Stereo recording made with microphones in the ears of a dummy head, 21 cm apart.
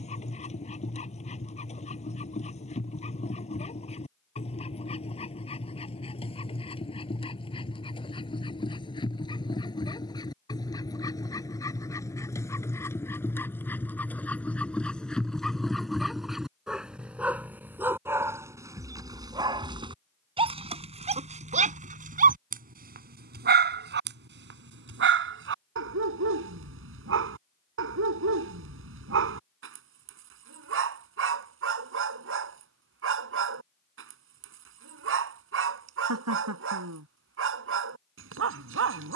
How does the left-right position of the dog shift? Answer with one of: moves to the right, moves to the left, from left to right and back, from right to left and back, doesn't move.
moves to the right.